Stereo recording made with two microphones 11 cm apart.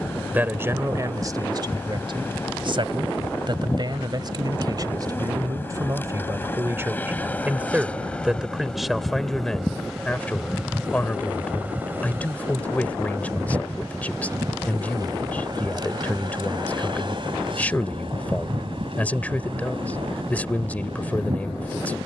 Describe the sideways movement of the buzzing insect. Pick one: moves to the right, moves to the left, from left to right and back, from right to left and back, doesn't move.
moves to the right.